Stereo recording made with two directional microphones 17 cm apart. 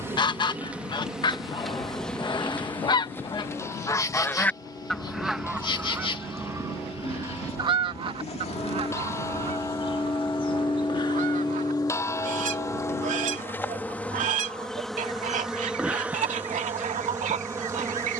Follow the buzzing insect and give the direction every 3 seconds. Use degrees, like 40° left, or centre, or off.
centre, 20° left, 30° left, 30° left, 10° left, 10° right.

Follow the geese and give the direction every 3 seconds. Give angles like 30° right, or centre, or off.
30° left, 10° left, 20° right, 40° right, 50° right, 50° right.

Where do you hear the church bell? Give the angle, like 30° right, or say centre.
20° left.